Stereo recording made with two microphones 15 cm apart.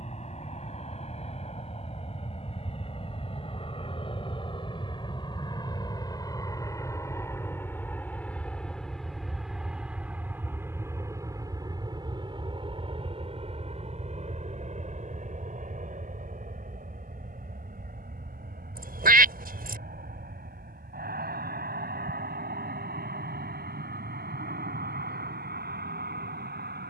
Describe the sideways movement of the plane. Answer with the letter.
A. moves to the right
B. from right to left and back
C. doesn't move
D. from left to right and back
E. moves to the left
A.